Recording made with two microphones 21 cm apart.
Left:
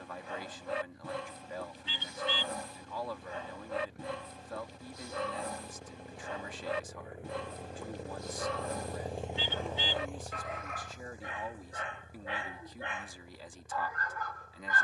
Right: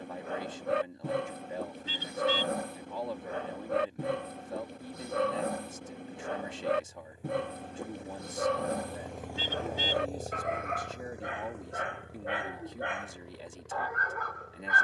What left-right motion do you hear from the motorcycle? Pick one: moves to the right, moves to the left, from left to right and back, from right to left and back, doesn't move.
moves to the right.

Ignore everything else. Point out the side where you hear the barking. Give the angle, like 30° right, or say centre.
60° right.